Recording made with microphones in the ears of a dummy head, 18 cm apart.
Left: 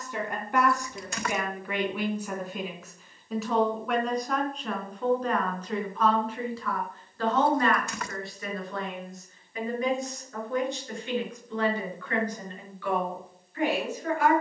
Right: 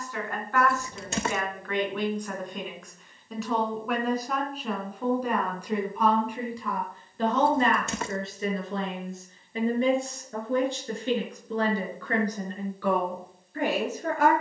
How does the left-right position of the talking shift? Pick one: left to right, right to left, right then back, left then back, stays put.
left to right.